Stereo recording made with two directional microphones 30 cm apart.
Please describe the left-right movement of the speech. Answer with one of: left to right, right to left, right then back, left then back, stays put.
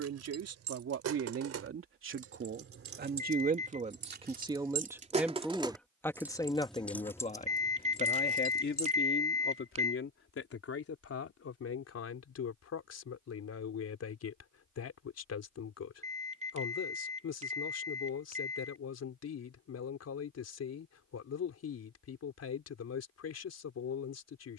right to left.